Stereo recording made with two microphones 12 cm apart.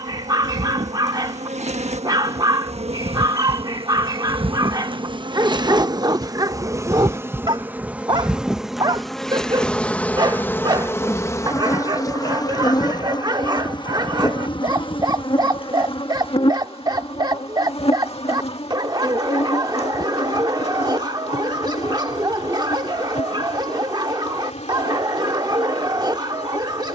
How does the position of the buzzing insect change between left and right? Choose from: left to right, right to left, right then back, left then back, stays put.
right to left.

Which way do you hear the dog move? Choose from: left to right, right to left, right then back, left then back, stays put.
stays put.